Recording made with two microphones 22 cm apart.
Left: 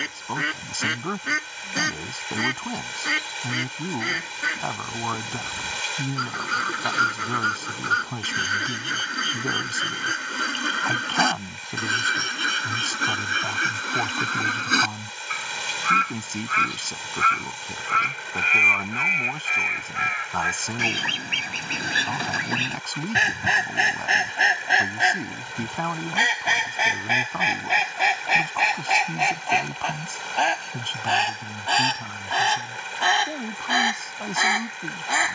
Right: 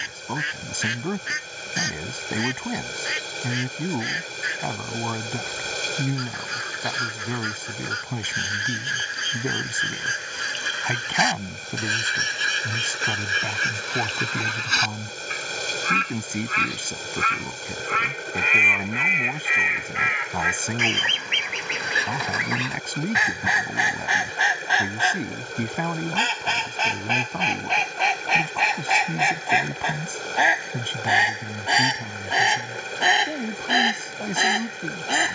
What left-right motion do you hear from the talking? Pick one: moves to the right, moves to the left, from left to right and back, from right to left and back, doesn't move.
doesn't move.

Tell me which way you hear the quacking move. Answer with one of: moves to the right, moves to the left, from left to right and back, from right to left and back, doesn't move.
moves to the right.